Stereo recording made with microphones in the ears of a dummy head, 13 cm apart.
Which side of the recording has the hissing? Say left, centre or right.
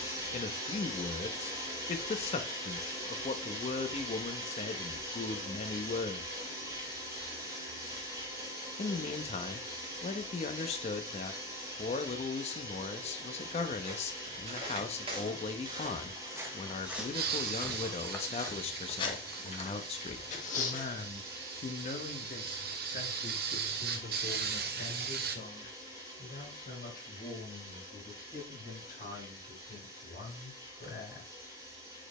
right.